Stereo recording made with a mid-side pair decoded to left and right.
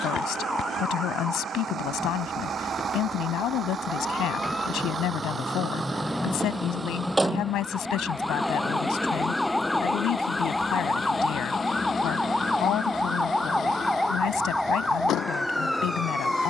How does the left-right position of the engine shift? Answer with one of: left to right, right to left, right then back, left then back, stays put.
right to left.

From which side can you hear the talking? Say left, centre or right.
left.